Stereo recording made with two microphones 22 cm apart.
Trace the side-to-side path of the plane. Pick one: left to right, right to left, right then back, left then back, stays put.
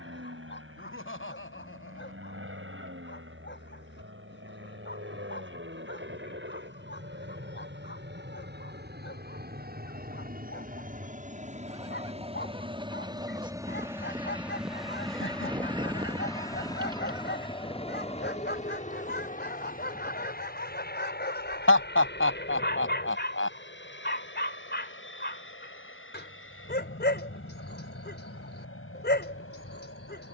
right to left.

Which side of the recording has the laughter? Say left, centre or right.
left.